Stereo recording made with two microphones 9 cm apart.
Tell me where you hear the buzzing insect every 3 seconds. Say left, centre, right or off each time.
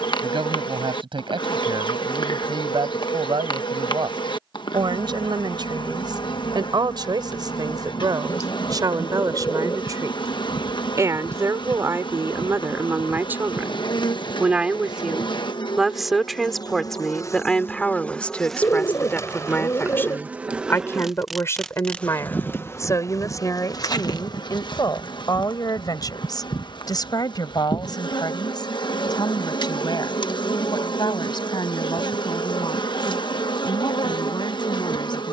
left, left, left, left, left, left, centre, left, left, left, left, left.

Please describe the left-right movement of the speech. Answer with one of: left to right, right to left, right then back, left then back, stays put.
right to left.